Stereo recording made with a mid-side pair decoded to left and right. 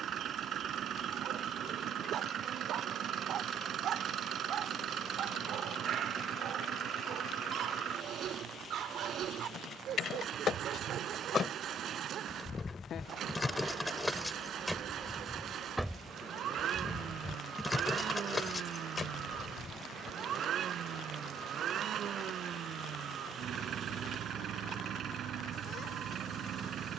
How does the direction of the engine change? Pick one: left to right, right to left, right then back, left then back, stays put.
stays put.